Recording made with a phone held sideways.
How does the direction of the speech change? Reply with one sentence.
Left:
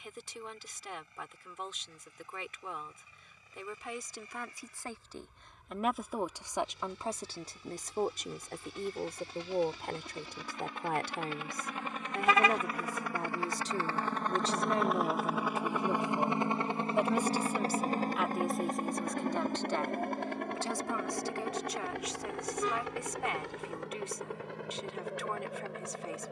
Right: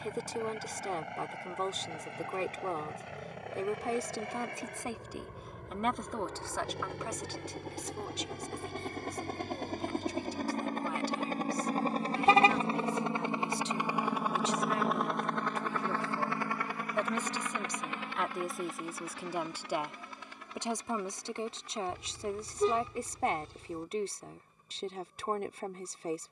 In this clip you hear the speech go left and come back.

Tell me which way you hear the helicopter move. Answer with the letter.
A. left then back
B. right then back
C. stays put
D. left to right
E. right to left
E.